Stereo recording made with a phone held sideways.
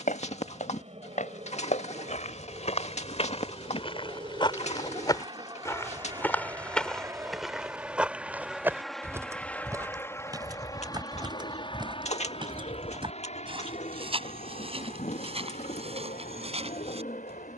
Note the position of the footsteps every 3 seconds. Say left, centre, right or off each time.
left, left, centre, right, right, right.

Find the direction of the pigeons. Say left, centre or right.
left.